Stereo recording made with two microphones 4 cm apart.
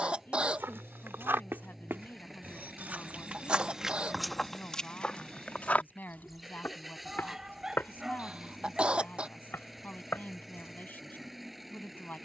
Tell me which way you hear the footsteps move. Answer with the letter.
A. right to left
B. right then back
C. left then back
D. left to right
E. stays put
A.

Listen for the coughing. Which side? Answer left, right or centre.
right.